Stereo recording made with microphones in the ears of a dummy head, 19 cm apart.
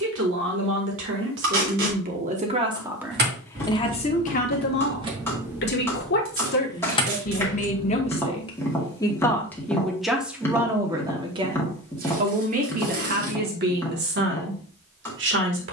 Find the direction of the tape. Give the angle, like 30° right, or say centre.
60° right.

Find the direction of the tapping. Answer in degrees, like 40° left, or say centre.
10° left.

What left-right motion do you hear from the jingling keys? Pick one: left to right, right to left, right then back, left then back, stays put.
right to left.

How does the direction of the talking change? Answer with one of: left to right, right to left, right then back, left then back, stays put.
left then back.